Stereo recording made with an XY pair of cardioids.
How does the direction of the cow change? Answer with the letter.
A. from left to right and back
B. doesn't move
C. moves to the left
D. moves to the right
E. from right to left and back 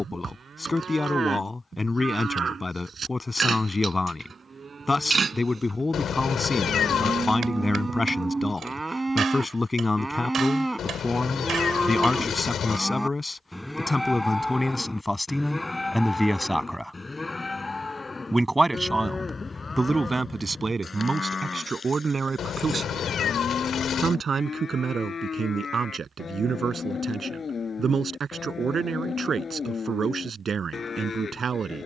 C.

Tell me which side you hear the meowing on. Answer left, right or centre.
left.